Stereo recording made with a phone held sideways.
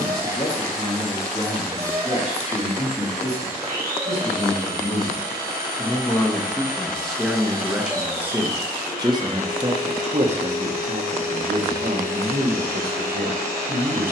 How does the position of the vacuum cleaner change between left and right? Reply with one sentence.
You can hear the vacuum cleaner stay put.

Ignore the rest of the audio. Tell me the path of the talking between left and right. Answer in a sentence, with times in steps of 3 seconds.
You can hear the talking on the left from 0 s, in the centre from 6 s and on the right from 9 s.